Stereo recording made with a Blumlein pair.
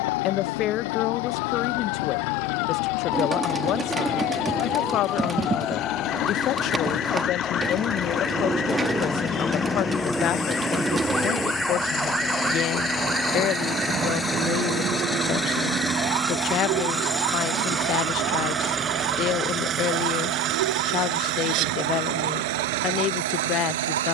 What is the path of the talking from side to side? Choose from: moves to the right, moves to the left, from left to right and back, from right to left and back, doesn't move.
doesn't move.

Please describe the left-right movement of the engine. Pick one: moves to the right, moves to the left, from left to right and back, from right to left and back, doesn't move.
moves to the right.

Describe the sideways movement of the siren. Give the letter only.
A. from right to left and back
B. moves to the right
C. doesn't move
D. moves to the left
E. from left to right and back
B.